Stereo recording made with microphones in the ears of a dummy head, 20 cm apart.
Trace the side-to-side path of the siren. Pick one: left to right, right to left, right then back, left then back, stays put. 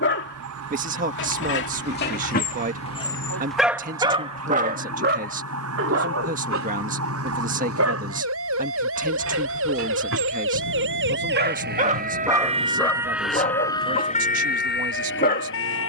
right to left.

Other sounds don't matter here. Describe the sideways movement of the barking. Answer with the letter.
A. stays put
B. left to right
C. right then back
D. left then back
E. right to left
C.